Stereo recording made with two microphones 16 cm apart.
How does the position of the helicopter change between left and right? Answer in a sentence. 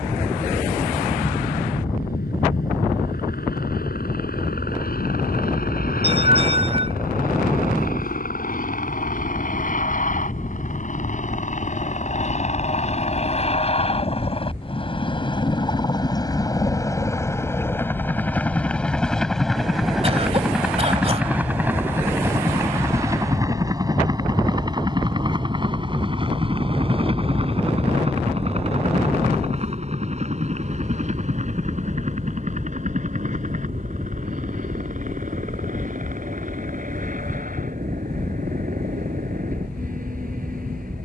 You can hear the helicopter travel towards the right.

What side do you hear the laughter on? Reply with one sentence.
You can hear the laughter on the right.